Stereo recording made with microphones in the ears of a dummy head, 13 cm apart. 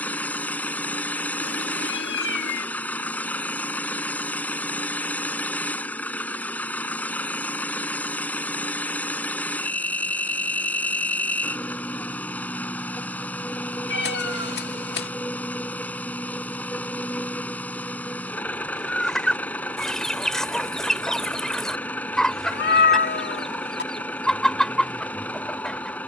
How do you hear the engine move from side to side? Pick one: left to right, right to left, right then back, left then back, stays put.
stays put.